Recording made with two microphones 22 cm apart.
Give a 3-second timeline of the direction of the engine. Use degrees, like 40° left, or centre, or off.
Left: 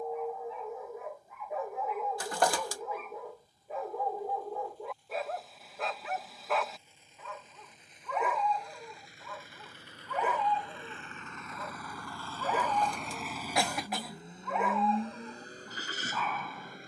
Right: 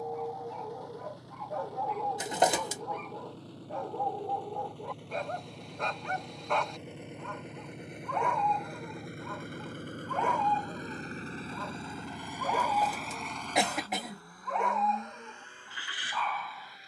80° right, 80° right, 70° right, 40° right, 10° left, 40° left.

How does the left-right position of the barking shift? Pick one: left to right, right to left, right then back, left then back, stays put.
stays put.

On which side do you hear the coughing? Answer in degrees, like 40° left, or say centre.
20° right.